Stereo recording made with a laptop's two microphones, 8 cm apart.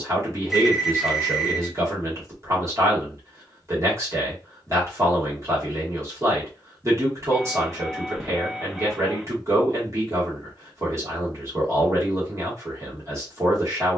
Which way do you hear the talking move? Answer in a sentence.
You can hear the talking stay put.